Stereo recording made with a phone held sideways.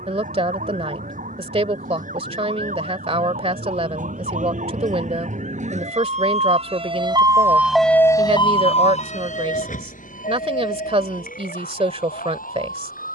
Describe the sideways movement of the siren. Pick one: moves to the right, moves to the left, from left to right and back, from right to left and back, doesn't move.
moves to the left.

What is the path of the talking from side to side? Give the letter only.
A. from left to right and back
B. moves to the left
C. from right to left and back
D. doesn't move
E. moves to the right
D.